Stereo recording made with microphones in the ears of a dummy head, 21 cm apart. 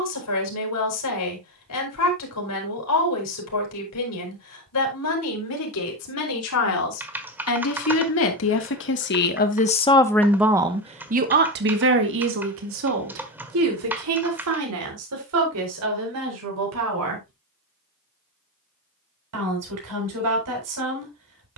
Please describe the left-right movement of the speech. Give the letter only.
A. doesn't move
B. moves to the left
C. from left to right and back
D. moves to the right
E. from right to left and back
D.